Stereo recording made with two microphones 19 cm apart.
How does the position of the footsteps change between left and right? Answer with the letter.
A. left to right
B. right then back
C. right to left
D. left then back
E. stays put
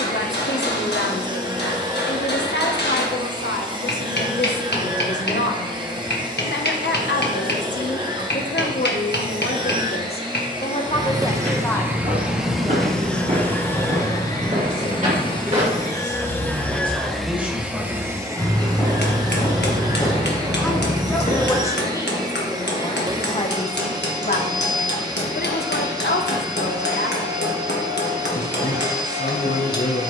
C.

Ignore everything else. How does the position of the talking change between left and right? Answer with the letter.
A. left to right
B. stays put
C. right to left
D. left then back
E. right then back
E.